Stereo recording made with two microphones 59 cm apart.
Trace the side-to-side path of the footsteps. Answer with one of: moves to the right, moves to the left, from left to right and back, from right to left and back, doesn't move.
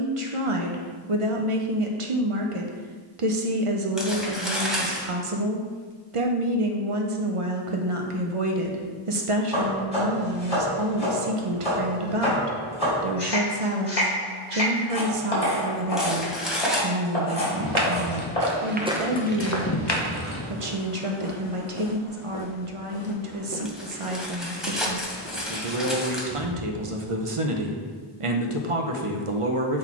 from right to left and back.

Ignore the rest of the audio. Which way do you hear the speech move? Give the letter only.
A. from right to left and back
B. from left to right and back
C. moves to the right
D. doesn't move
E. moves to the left
D.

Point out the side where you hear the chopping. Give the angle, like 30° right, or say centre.
80° left.